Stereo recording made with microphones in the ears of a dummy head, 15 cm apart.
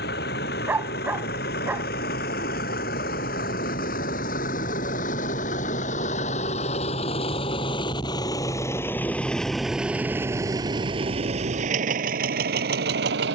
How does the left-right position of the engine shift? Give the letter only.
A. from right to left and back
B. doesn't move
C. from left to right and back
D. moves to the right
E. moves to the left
D.